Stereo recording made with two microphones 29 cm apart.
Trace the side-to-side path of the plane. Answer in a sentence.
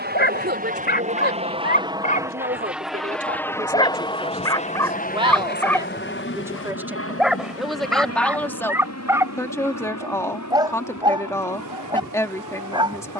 You can hear the plane travel towards the left.